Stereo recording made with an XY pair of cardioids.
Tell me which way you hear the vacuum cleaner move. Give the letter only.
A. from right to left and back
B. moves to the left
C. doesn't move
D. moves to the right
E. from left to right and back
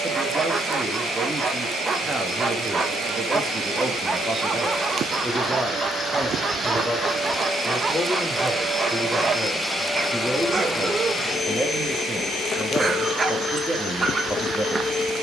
B.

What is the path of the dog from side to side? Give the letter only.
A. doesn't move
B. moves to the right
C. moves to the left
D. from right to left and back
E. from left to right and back
A.